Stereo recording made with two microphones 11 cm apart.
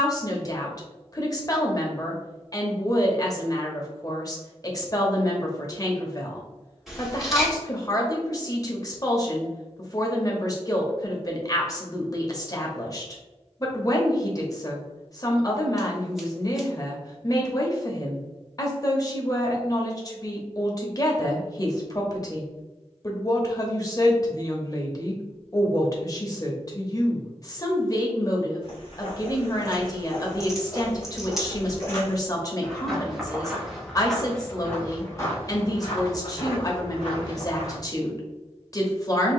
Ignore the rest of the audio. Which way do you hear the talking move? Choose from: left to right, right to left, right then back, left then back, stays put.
stays put.